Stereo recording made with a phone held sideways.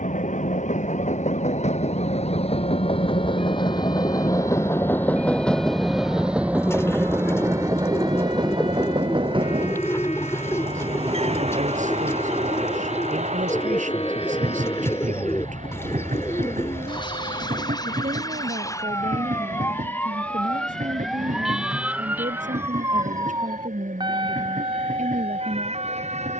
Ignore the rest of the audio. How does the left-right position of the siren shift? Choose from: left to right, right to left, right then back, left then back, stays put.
left to right.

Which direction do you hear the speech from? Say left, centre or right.
right.